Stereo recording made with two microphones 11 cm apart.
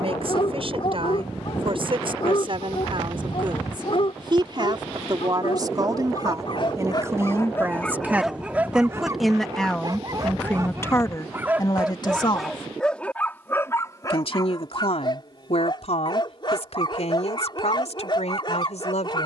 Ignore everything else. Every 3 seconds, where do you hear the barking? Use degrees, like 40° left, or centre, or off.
50° left, 50° left, 20° left, 30° right, 20° left, 40° left, 40° left.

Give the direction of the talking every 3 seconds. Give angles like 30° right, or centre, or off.
50° right, 40° right, 20° right, 20° left, 50° left, 70° left, 80° left.